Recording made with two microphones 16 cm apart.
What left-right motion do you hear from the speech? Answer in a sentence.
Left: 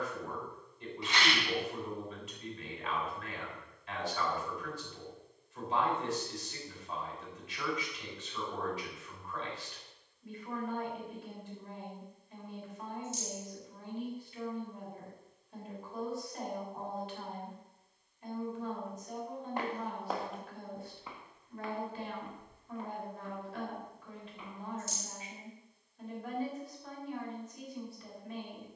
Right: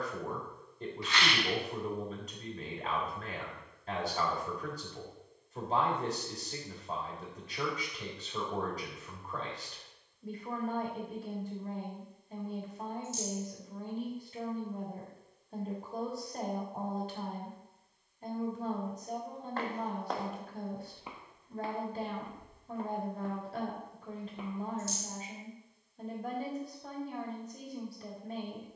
You can hear the speech stay in one place.